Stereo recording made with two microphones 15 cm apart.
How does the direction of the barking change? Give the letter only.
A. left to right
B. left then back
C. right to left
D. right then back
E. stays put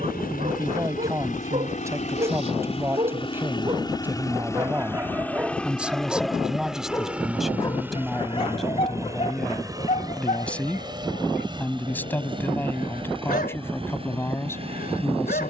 C.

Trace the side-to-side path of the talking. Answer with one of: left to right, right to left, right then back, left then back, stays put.
right to left.